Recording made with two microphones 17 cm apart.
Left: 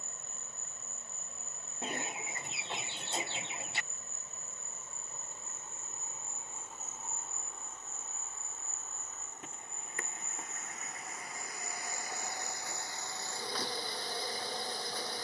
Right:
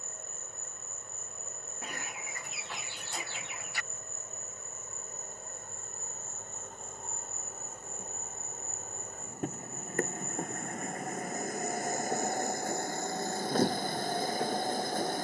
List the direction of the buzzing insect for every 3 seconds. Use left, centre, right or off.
left, left, centre, centre, left.